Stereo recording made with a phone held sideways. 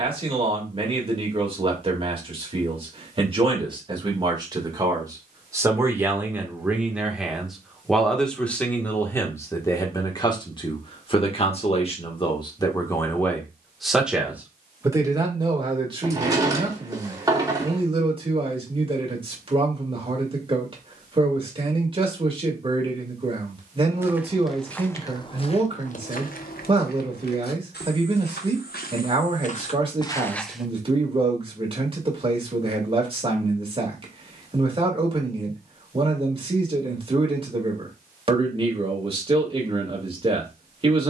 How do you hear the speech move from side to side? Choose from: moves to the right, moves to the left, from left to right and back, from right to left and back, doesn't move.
from right to left and back.